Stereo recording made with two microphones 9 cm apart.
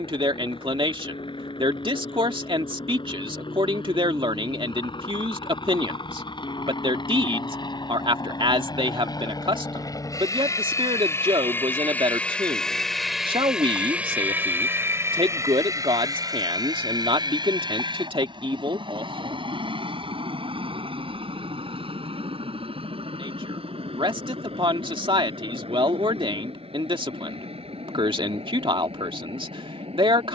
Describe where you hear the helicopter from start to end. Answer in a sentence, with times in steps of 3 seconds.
You can hear the helicopter on the left from 0 s, in the centre from 12 s and on the right from 15 s.